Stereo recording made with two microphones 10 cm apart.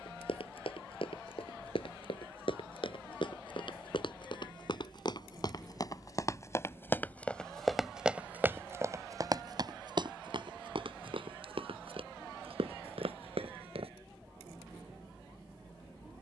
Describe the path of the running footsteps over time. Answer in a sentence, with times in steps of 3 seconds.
In this clip you hear the running footsteps on the left from 0 s, in the centre from 6 s, on the right from 9 s and not at all from 15 s.